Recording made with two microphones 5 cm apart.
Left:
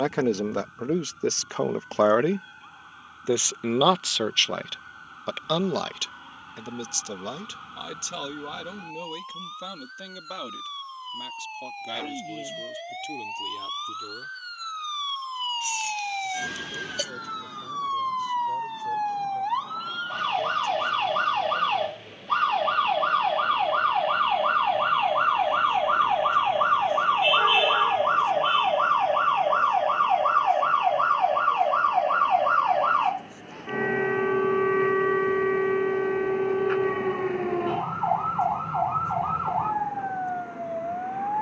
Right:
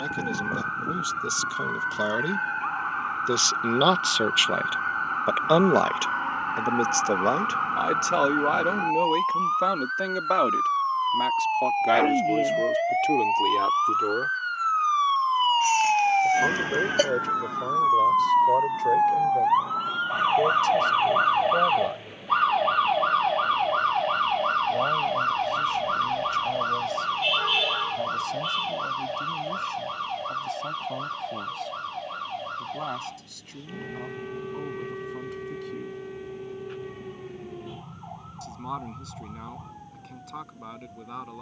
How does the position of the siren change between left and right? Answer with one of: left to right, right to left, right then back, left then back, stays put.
right to left.